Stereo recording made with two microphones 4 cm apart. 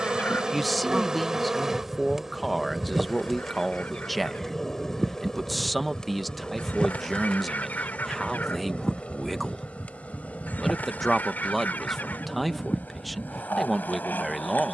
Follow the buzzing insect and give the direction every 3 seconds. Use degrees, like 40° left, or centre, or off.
10° right, 10° left, 30° left, 40° left, 50° left.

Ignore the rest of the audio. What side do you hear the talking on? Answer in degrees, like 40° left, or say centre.
centre.